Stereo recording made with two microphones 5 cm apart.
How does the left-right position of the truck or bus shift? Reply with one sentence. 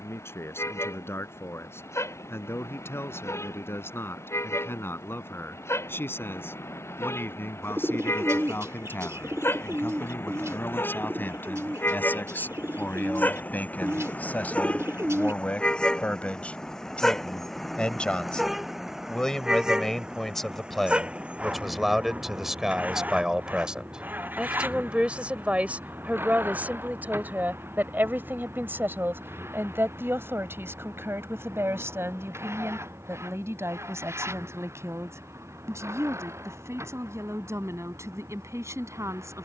You can hear the truck or bus move to the right.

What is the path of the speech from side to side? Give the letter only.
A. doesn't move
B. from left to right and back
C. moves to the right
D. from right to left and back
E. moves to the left
C.